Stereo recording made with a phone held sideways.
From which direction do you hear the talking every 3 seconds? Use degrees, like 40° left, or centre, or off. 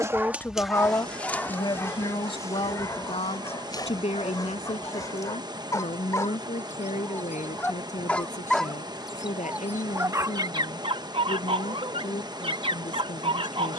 30° left, 50° left, 60° left, 60° left, 60° left.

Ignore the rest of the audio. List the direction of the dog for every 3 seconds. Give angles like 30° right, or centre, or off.
10° left, 30° left, 10° left, 30° right, 40° right.